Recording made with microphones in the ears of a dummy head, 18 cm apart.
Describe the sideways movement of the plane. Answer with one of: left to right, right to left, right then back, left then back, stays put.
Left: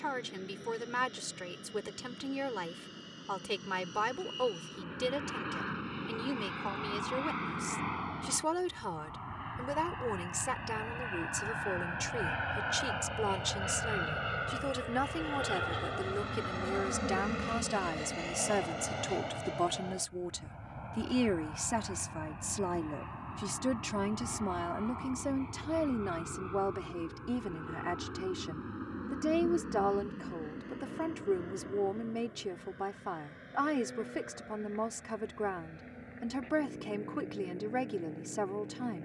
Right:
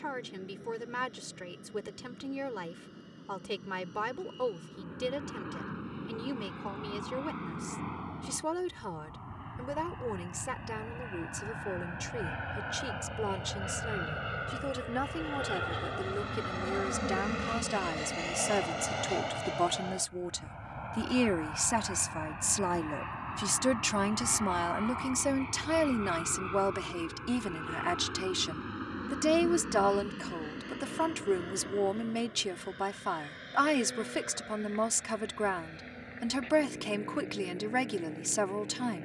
left to right.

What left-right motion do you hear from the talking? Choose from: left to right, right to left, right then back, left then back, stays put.
left to right.